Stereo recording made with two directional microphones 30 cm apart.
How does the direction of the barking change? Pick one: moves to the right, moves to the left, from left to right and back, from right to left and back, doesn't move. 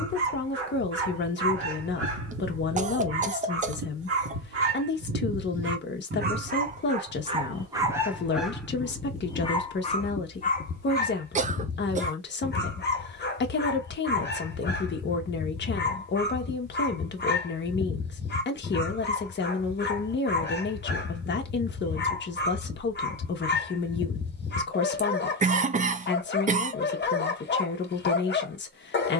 moves to the left.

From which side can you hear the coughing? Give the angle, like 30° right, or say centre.
30° right.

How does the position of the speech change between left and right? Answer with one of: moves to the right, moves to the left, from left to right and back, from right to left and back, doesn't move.
doesn't move.